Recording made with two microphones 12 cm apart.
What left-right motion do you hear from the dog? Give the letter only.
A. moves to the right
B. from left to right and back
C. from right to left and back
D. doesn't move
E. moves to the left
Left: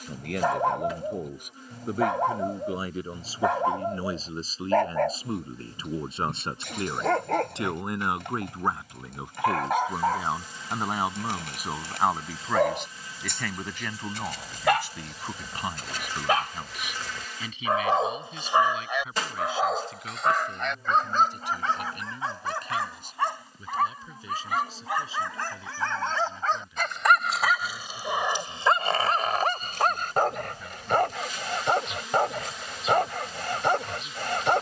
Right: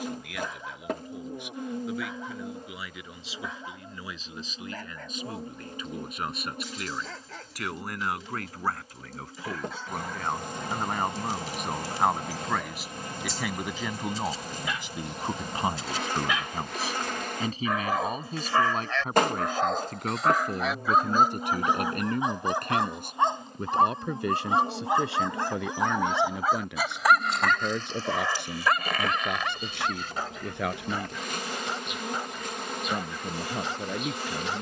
B.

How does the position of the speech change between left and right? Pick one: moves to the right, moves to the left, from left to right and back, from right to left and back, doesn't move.
moves to the right.